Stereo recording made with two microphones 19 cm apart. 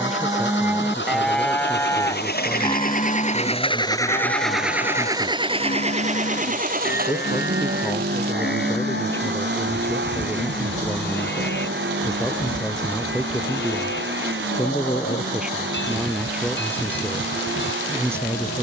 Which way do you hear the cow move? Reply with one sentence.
You can hear the cow go from the right side to the left.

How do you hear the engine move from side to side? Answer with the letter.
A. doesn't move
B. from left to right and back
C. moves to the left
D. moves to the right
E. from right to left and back
D.